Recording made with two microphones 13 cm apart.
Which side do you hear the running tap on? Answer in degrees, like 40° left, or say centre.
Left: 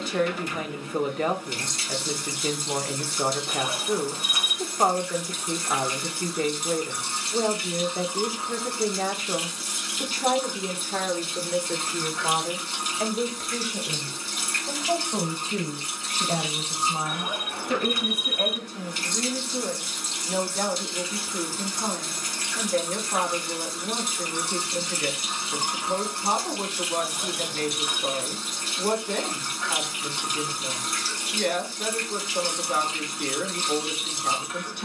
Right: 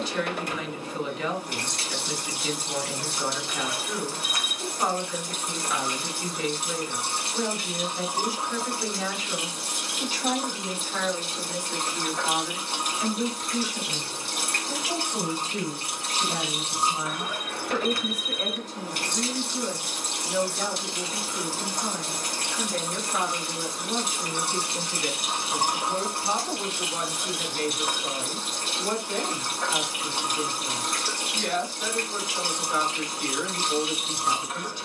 60° right.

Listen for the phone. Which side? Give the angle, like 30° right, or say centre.
20° left.